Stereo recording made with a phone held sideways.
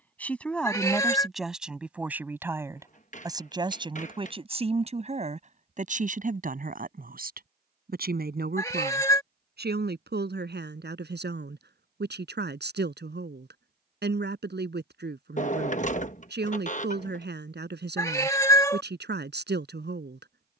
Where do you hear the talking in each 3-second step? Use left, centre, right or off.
centre, right, right, right, right, right, right.